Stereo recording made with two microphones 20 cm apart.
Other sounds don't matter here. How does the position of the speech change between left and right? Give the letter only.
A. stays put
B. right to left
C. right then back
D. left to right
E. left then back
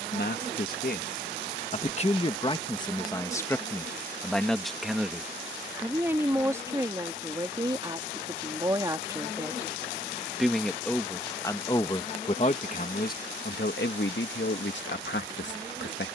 C.